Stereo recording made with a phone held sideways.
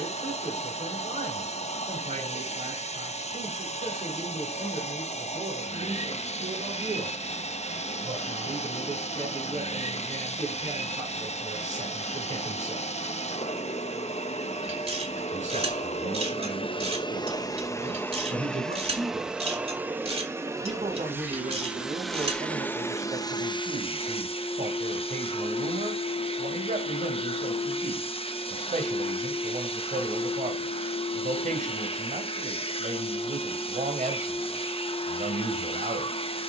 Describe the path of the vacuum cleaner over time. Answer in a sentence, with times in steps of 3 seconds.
In this clip you hear the vacuum cleaner on the left from 0 s, in the centre from 18 s and on the left from 24 s.